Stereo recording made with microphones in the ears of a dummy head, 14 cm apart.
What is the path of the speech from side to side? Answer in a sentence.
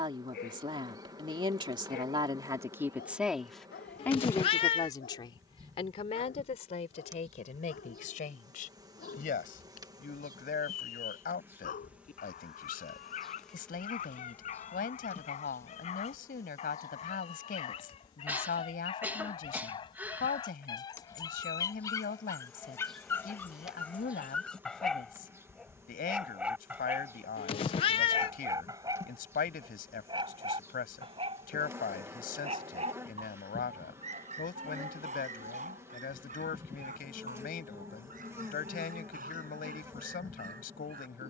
You can hear the speech move from right to left.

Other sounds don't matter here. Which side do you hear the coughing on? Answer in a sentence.
In this clip you hear the coughing in the centre.